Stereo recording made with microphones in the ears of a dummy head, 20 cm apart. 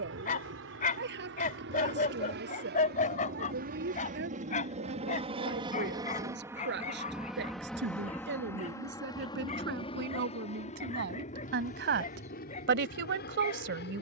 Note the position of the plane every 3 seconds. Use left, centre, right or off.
right, right, centre, left, left.